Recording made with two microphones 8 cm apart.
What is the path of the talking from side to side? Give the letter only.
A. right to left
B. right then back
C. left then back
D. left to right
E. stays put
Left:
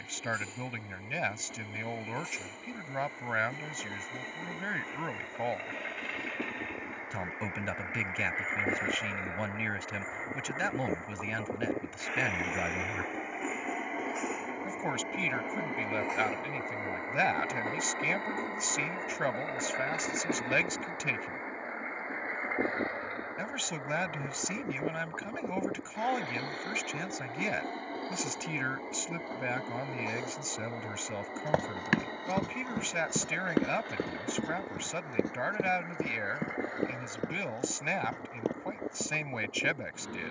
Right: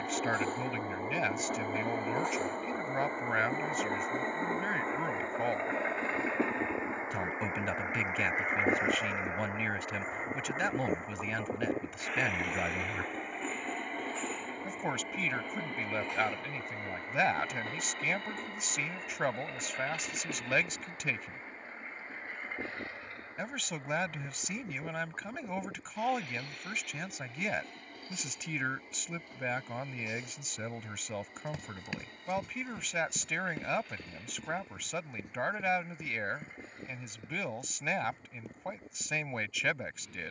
E.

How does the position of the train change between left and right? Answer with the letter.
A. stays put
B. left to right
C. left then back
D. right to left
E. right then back
D.